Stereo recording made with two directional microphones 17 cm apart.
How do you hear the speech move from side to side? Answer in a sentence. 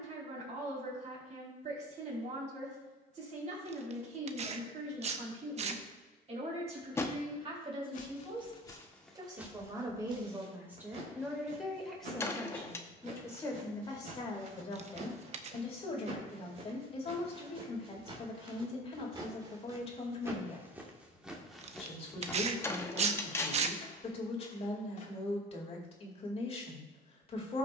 You can hear the speech move from right to left.